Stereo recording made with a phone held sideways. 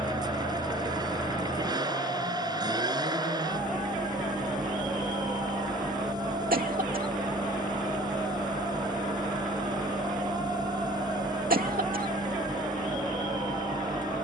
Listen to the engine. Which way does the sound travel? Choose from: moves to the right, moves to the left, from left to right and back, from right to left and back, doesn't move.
doesn't move.